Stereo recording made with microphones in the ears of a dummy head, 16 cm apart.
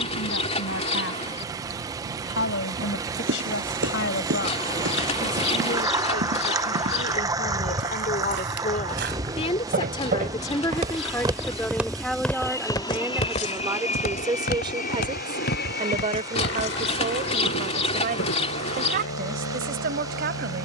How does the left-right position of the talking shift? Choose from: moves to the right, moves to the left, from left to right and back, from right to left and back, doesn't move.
moves to the right.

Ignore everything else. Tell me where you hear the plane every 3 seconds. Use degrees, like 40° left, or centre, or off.
60° right, 60° right, 40° right, 10° right, 30° left, 60° left, 70° left.